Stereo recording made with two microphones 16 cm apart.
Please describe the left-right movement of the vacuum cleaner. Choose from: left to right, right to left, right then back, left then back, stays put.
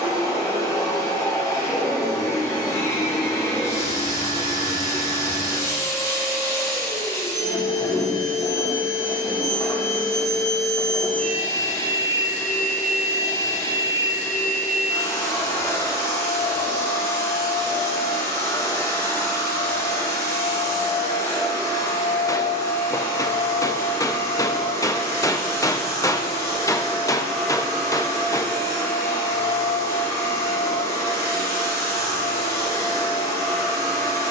stays put.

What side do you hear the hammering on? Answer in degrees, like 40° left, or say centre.
20° left.